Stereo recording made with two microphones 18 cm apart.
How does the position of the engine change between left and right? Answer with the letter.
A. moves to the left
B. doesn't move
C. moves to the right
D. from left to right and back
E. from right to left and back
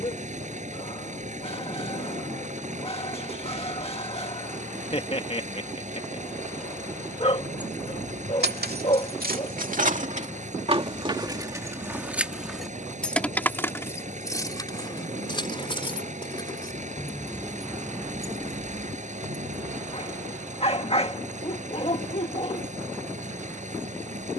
B.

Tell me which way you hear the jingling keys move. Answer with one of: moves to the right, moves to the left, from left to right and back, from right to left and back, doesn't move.
from right to left and back.